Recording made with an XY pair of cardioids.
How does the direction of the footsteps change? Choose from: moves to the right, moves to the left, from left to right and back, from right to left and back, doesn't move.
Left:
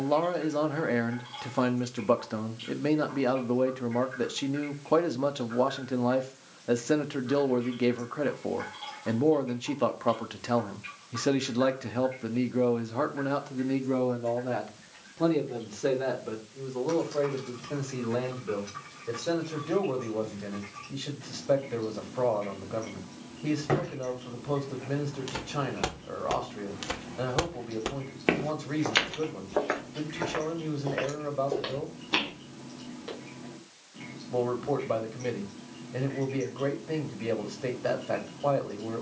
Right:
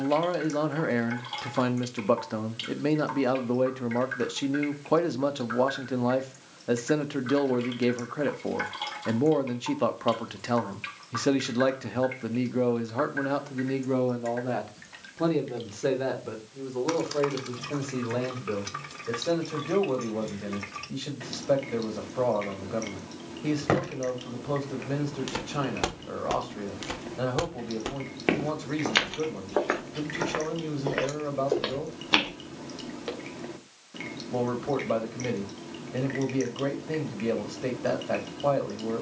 from right to left and back.